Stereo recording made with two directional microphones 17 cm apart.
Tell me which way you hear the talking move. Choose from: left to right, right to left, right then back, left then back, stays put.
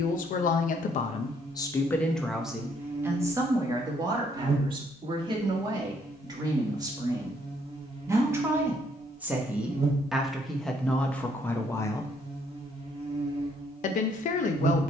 right then back.